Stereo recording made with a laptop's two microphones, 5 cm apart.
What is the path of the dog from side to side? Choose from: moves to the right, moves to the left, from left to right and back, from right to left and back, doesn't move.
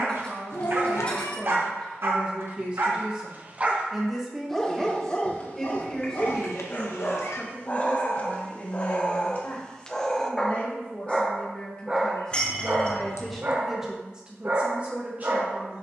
from right to left and back.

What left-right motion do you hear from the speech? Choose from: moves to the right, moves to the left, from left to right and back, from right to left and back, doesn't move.
from right to left and back.